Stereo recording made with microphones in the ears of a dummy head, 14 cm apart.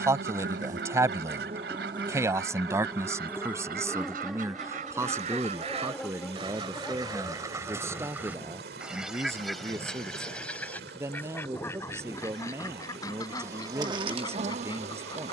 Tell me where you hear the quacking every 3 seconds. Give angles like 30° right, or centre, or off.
70° right, 50° right, 20° right, 10° left, 20° left.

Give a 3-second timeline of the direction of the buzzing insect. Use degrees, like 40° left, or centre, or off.
30° right, centre, 10° left, 10° left, 20° right.